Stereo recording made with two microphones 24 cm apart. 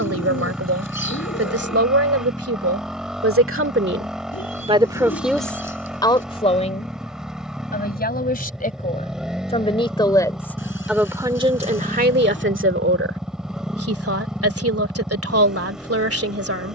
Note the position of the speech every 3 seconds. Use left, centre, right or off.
right, right, left, centre, right, right.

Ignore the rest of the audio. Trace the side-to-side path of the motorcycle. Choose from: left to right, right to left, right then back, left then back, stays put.
stays put.